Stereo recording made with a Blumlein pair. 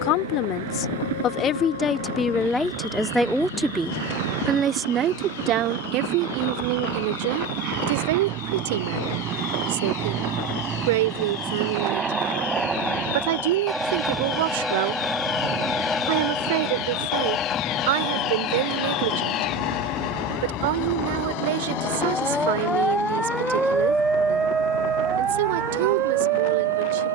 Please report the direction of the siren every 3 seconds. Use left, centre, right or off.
left, left, left, left, left, left, left, centre, right.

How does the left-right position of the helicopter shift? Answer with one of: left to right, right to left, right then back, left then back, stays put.
right to left.